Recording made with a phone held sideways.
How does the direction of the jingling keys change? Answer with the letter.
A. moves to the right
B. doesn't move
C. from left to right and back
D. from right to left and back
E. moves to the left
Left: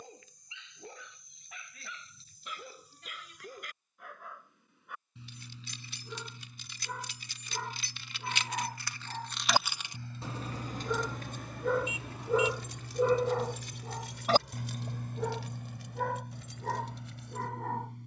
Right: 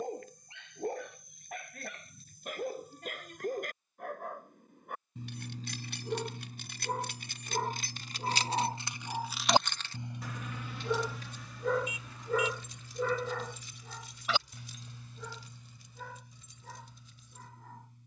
E.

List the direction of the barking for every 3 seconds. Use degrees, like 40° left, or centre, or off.
50° right, 50° right, 40° right, 10° right, 30° left, 70° left.